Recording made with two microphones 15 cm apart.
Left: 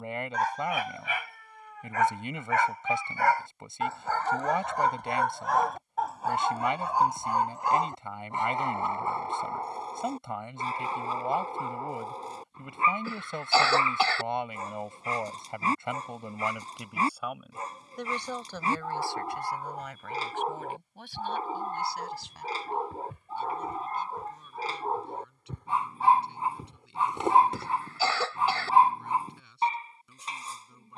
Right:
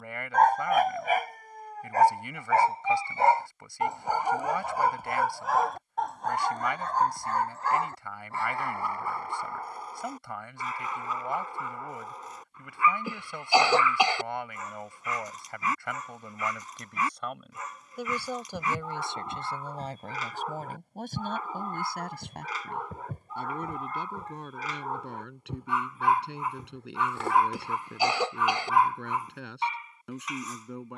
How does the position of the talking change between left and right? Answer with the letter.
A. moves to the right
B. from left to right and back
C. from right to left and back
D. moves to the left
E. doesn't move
A.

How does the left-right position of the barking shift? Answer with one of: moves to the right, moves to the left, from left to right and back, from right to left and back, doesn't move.
moves to the left.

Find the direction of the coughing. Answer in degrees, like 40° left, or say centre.
10° right.